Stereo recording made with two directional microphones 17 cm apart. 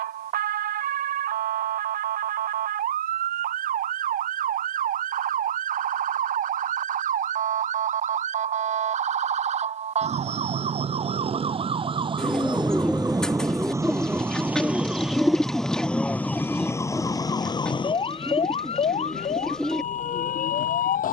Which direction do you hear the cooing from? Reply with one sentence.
You can hear the cooing in the centre.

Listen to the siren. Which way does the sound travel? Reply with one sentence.
You can hear the siren move from right to left.